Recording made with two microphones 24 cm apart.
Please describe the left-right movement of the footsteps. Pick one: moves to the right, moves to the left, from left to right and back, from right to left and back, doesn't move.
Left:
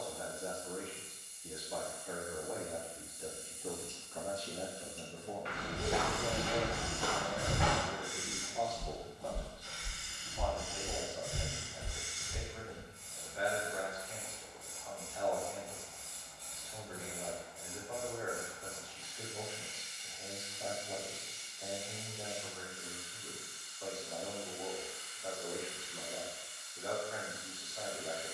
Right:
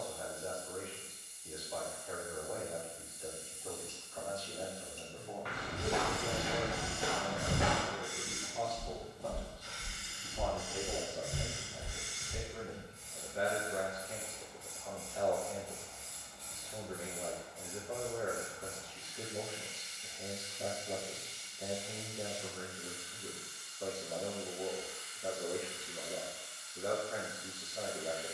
from left to right and back.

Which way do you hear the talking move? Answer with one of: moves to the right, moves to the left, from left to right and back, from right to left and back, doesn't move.
moves to the right.